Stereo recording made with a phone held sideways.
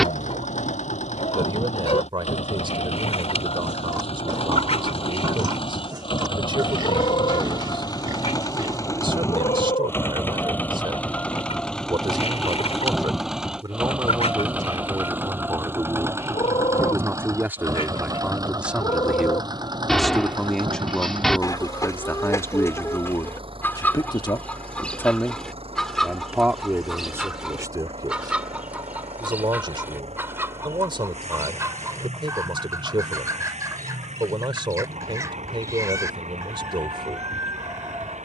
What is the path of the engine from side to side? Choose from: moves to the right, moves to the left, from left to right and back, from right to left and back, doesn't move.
moves to the right.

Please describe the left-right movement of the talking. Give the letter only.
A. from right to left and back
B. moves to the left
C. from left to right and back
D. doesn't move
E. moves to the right
A.